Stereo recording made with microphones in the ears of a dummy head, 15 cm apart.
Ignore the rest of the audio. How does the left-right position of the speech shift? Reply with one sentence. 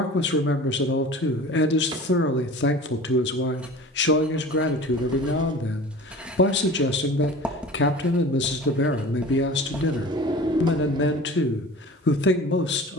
You can hear the speech stay in one place.